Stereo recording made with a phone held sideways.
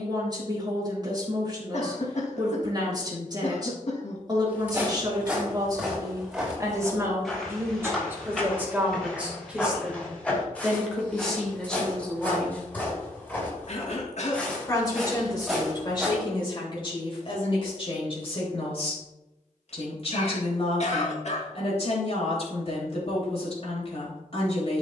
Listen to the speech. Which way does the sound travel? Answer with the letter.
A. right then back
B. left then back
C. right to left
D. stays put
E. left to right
C.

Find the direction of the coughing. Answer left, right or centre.
left.